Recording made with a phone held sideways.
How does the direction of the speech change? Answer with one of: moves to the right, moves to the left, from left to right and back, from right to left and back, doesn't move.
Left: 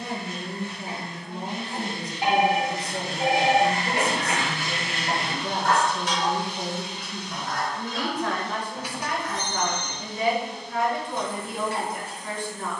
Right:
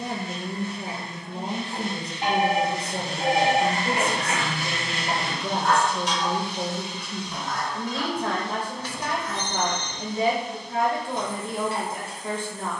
doesn't move.